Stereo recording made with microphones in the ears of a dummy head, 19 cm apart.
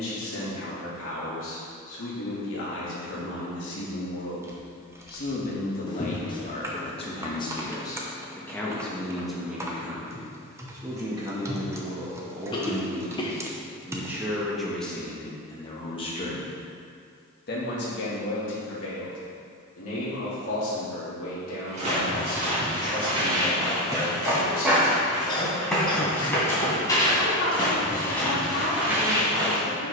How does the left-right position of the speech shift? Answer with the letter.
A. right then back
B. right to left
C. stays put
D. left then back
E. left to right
A.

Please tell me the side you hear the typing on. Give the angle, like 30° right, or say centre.
10° right.